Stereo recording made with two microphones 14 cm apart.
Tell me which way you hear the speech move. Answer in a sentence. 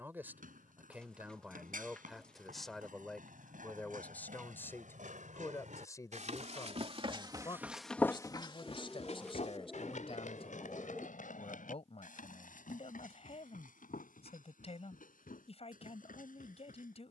You can hear the speech move to the left.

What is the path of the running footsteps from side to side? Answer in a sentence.
You can hear the running footsteps move to the left.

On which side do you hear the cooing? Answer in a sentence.
In this clip you hear the cooing in the centre.